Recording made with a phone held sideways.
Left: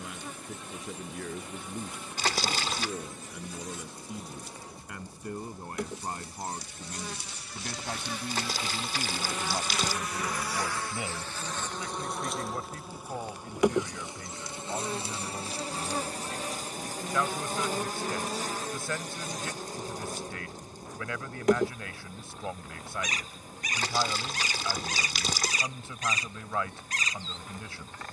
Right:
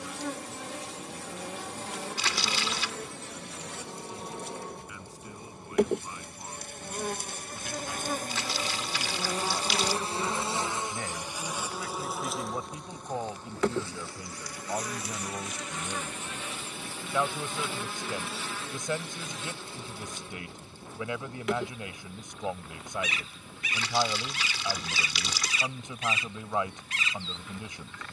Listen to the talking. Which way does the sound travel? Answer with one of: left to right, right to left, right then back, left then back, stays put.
left to right.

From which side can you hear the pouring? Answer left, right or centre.
left.